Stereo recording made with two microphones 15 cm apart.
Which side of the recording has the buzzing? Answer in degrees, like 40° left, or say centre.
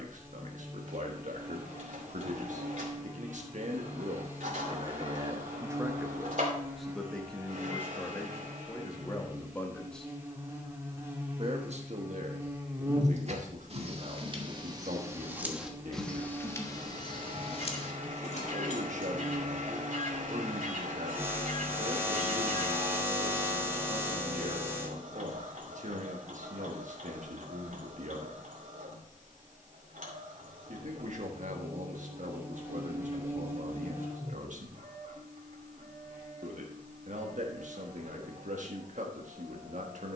20° right.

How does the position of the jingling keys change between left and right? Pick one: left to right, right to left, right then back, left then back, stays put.
right to left.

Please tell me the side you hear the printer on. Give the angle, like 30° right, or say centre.
60° right.